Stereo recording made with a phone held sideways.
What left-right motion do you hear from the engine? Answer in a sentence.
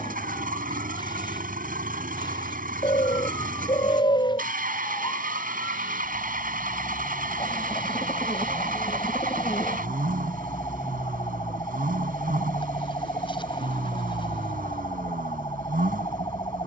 You can hear the engine stay put.